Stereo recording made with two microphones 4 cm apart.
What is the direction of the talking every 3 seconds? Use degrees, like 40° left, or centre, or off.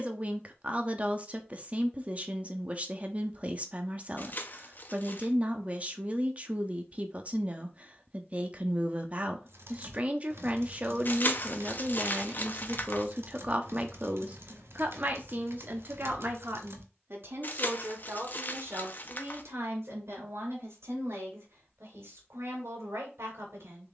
30° right, 30° right, 30° right, 30° right, 30° right, 50° right, 70° right, 70° right.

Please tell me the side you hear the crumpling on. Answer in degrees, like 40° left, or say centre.
40° left.